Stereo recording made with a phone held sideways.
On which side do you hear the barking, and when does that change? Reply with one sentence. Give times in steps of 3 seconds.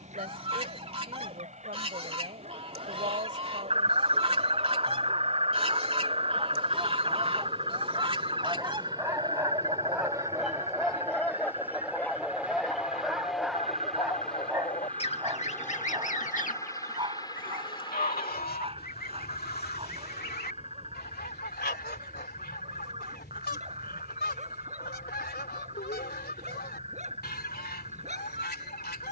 You can hear the barking on the right from 0 s, in the centre from 9 s and on the right from 15 s.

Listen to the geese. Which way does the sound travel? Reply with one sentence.
You can hear the geese move from right to left.